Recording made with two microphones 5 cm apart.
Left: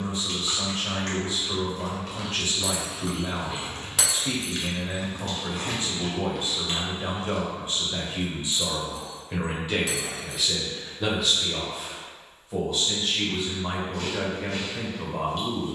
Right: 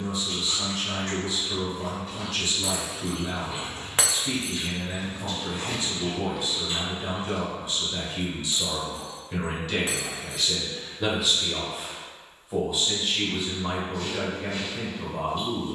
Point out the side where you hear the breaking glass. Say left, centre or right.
right.